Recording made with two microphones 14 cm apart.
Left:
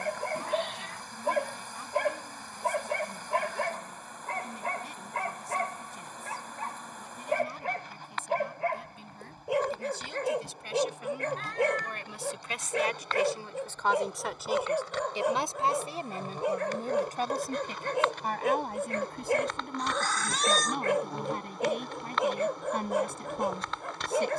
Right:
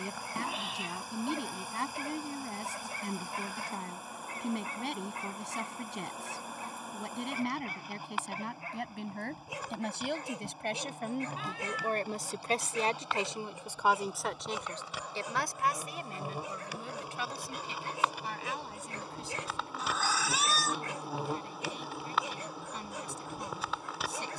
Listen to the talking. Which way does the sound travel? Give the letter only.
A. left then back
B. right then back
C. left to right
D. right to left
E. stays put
D.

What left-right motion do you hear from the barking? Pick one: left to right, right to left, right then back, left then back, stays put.
stays put.